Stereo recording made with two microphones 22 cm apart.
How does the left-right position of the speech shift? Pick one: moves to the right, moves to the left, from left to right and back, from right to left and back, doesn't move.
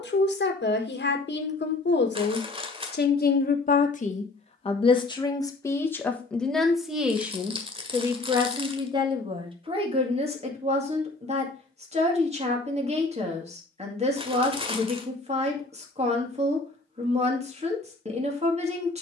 moves to the right.